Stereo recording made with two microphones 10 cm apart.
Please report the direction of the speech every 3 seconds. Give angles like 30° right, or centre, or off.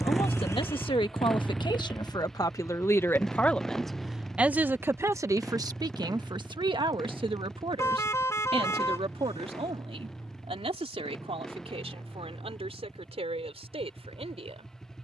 50° left, 10° right, 60° right, 70° right, 70° right.